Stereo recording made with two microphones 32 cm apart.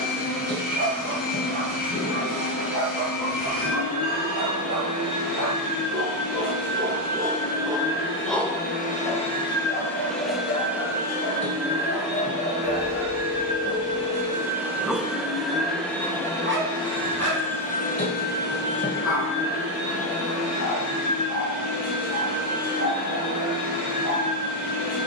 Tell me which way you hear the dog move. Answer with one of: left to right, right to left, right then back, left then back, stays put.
left then back.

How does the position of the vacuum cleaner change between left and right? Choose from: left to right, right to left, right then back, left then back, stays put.
right then back.